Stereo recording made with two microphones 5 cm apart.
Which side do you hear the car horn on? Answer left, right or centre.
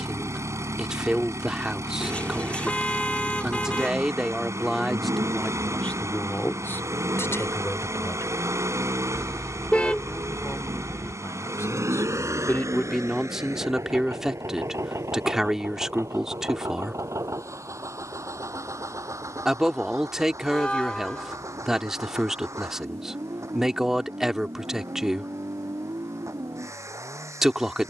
left.